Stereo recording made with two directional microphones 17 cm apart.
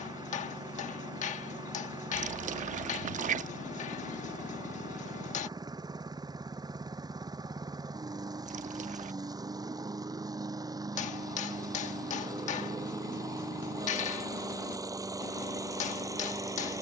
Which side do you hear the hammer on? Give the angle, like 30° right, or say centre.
50° left.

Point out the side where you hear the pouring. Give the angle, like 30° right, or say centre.
50° right.